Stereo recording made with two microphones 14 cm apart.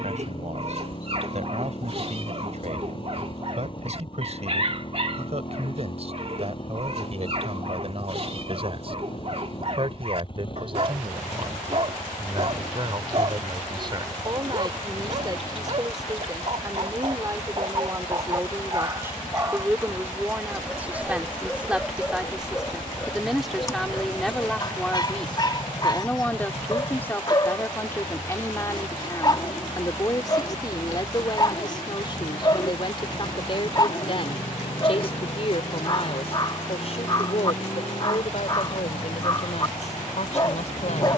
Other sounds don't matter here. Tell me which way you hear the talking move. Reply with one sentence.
In this clip you hear the talking travel towards the left.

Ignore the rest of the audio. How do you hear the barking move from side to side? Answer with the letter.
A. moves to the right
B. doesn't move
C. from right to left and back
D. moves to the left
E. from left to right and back
D.